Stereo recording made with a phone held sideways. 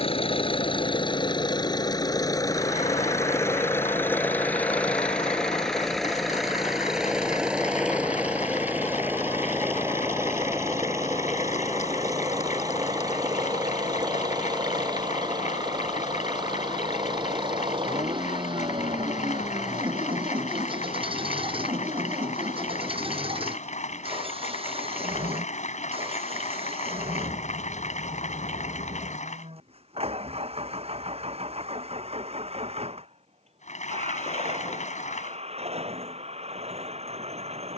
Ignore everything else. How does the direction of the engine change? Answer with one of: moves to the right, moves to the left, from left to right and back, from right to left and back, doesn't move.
moves to the right.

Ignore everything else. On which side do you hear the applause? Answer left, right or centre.
left.